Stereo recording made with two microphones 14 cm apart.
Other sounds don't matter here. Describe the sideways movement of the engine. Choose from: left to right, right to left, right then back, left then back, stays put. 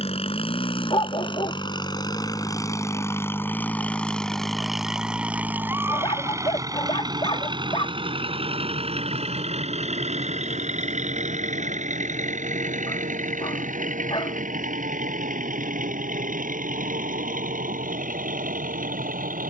left to right.